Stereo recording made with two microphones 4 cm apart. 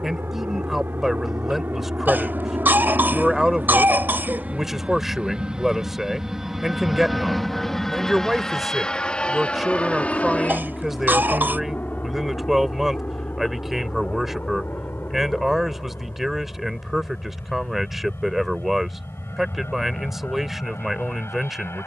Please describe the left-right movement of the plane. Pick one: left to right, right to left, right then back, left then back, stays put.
right to left.